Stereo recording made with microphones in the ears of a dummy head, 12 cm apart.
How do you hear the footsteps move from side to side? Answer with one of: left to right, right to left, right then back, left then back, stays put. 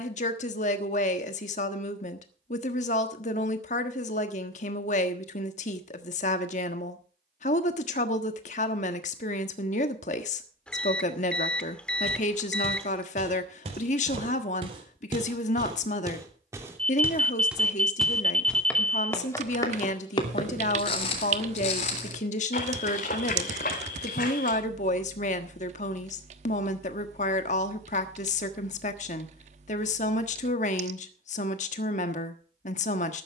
right to left.